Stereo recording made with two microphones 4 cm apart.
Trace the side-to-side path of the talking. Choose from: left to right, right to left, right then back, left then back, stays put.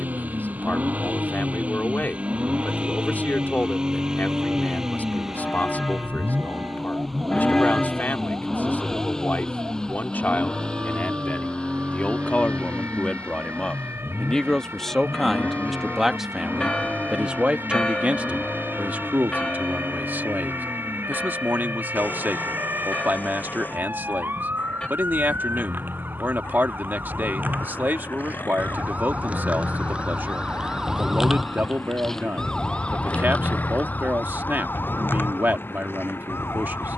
left to right.